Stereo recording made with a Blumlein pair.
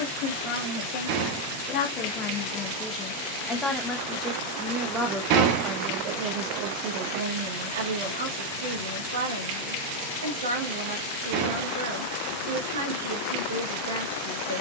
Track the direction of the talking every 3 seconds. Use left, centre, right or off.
left, centre, right, right, right.